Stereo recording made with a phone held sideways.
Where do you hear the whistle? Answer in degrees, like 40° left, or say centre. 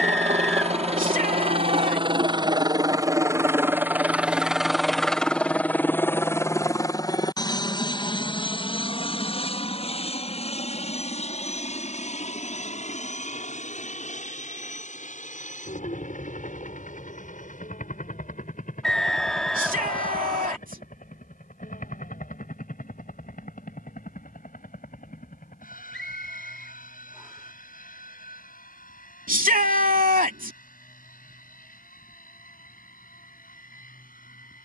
centre.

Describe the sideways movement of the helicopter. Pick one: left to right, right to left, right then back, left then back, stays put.
right to left.